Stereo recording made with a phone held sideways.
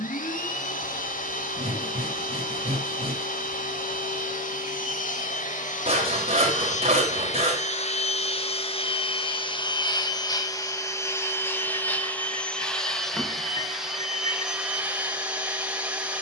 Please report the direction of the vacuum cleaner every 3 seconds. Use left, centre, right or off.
left, left, left, left, centre, centre.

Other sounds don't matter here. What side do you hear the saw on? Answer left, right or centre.
right.